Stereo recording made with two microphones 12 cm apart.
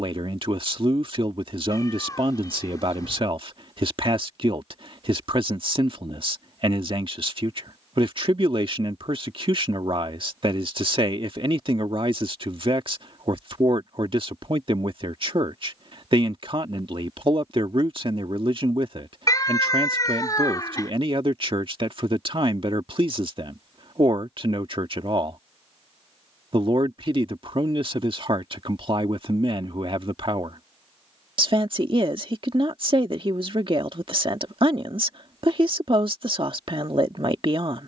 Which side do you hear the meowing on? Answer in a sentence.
In this clip you hear the meowing on the left.